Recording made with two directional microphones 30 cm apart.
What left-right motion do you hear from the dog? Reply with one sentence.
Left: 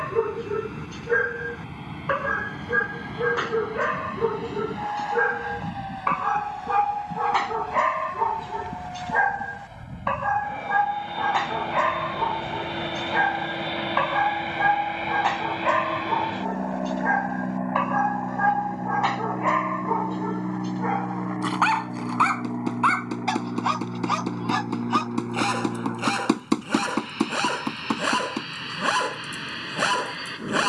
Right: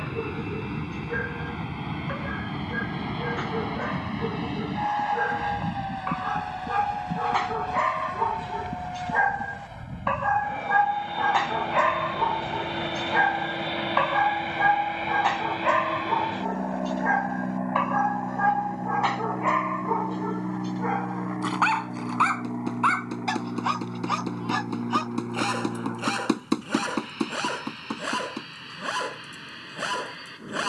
You can hear the dog go right and come back.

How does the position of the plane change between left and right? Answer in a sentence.
In this clip you hear the plane move from right to left.